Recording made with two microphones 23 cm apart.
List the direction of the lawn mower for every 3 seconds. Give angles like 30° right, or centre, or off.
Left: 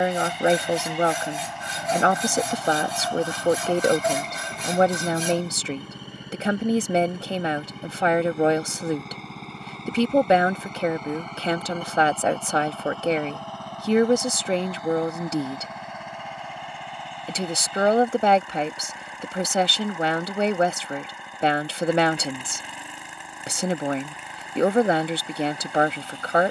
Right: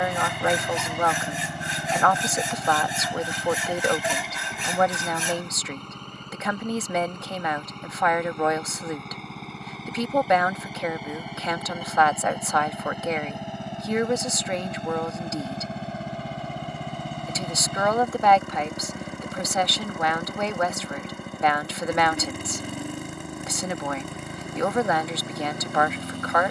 40° right, centre, 10° left, centre, 20° right, 40° right, 50° right, 50° right, 50° right.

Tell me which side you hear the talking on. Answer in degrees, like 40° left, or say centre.
30° left.